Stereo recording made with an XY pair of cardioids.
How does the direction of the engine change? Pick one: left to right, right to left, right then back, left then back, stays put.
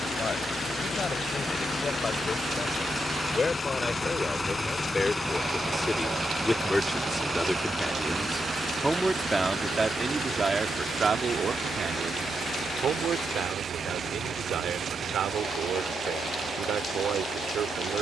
left to right.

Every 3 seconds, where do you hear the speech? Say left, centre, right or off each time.
left, left, centre, right, right, right.